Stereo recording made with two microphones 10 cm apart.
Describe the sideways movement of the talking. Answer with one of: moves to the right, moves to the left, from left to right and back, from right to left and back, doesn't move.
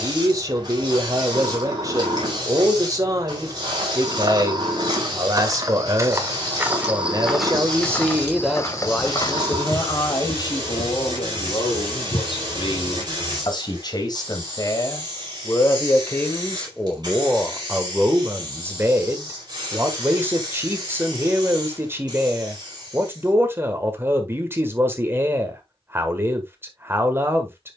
from right to left and back.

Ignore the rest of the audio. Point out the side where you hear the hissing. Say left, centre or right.
right.